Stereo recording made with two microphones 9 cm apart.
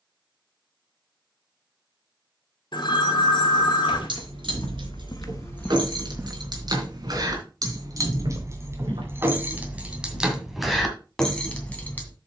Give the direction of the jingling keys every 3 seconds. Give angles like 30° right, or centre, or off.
off, 70° right, 50° right, centre.